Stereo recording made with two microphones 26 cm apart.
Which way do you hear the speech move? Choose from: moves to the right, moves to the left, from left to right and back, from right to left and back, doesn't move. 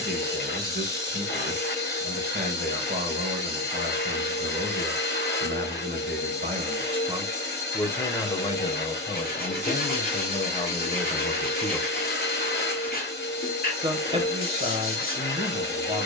from right to left and back.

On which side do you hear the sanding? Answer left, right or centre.
left.